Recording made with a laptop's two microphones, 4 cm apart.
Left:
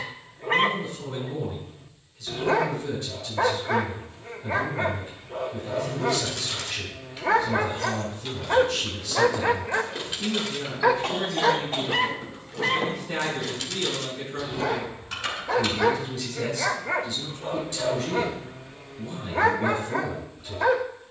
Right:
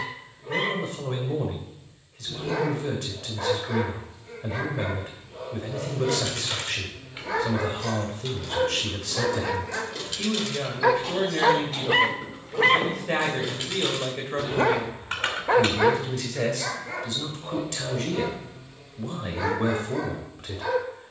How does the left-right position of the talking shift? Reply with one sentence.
You can hear the talking stay in one place.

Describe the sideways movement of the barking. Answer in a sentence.
You can hear the barking go right and come back.